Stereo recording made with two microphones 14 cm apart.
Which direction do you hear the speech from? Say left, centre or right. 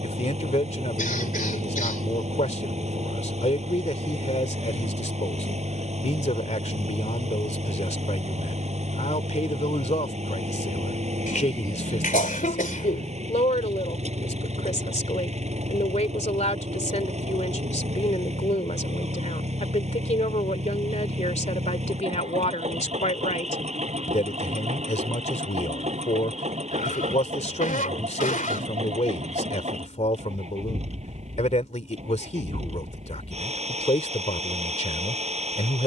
left.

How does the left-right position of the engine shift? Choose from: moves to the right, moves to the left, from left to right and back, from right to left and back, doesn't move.
doesn't move.